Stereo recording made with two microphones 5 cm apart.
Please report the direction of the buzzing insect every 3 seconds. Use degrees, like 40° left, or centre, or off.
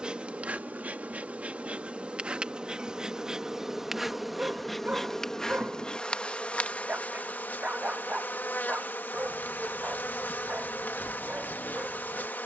30° right, centre, 30° left, 40° left.